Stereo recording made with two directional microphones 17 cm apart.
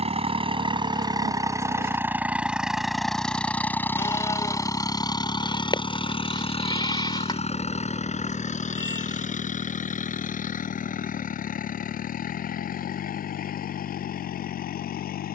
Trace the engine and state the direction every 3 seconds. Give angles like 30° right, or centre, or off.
20° right, 20° left, 40° left, 50° left, 60° left.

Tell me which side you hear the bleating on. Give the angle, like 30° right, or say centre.
30° left.